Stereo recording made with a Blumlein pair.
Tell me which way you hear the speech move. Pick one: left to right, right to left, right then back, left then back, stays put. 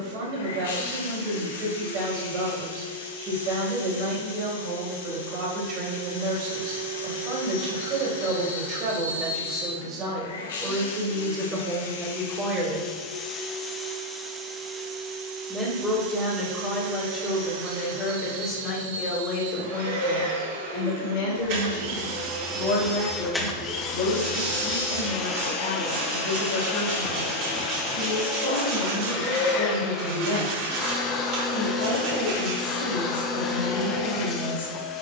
right to left.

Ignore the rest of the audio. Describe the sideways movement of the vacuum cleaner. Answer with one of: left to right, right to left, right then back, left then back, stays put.
right then back.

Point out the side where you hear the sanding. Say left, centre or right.
right.